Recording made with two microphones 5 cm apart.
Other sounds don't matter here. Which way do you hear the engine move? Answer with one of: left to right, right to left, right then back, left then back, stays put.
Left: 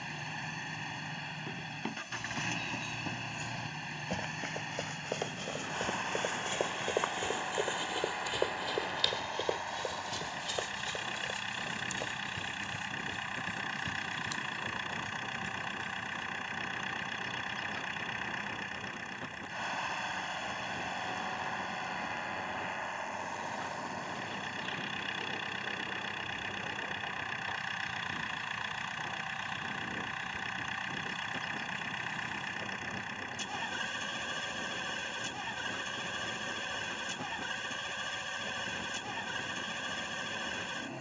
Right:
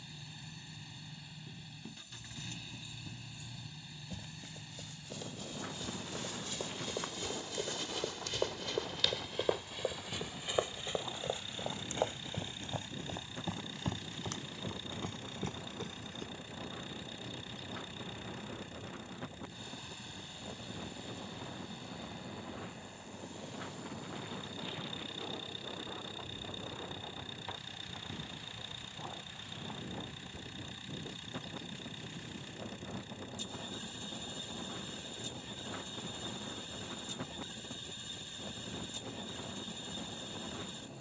stays put.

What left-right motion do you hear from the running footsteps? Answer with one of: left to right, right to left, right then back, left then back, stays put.
left to right.